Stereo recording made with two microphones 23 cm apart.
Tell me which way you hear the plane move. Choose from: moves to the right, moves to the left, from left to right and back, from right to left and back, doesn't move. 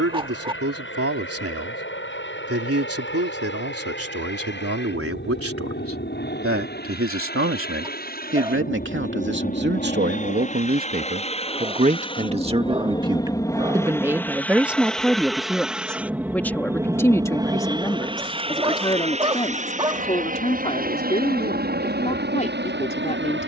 moves to the right.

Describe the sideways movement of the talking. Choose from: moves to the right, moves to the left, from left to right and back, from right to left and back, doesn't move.
moves to the left.